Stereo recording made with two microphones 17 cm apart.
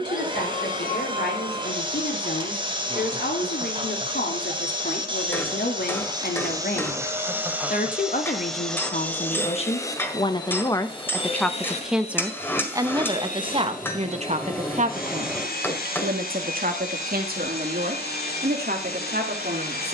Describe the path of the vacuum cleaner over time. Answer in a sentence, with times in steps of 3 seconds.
In this clip you hear the vacuum cleaner on the right from 0 s, in the centre from 6 s and on the left from 9 s.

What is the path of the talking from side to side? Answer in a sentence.
In this clip you hear the talking go from the left side to the right.